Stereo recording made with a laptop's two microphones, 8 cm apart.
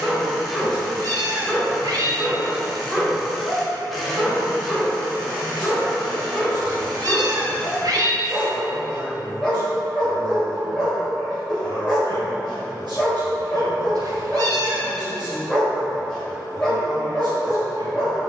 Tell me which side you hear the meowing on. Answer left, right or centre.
right.